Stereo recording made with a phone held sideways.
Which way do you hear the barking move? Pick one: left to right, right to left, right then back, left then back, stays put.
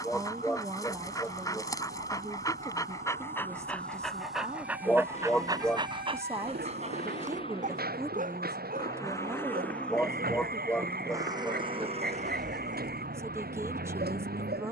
left to right.